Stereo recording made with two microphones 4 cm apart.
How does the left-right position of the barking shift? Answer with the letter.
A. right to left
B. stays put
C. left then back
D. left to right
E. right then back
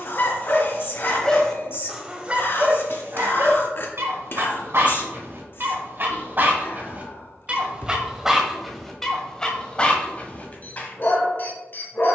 E.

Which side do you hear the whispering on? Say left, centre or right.
left.